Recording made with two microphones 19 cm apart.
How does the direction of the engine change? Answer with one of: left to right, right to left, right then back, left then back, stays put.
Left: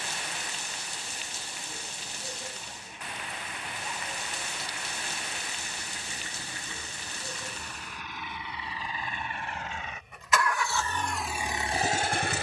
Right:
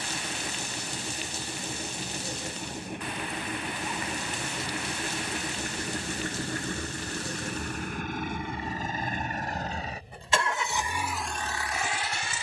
right to left.